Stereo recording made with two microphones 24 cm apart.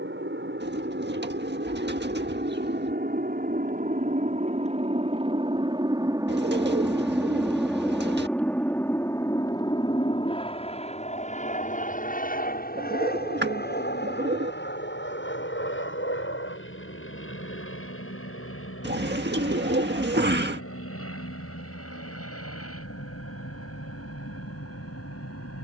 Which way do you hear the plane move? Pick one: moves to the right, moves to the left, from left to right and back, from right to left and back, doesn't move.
moves to the left.